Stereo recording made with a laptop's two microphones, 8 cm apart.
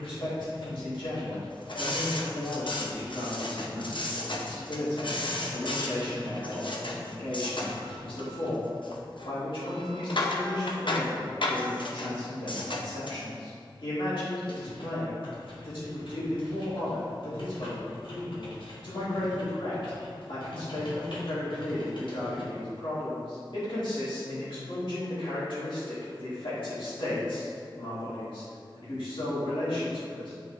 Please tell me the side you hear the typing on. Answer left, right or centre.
left.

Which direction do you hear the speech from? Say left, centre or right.
left.